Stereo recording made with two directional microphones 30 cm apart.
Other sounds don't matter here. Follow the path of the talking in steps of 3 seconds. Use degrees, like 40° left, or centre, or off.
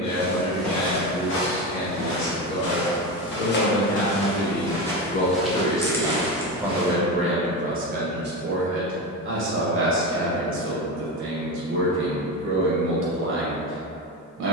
60° left, 30° left, 20° right, 40° right, 40° right.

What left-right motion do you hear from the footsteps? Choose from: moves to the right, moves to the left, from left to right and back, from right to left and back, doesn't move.
from right to left and back.